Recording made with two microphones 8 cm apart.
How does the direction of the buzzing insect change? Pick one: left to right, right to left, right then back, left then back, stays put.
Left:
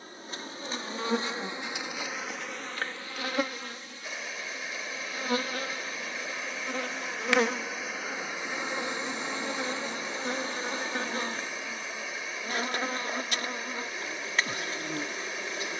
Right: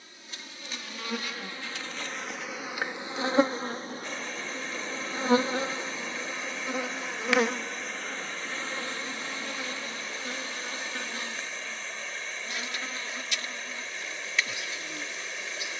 right then back.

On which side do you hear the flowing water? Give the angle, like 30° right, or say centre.
10° left.